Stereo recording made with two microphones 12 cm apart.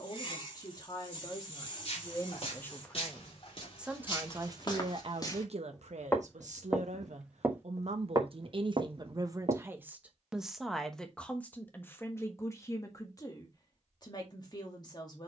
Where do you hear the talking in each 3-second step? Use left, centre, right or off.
left, right, right, centre, left.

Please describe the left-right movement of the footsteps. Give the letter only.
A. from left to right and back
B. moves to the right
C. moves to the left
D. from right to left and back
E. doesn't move
B.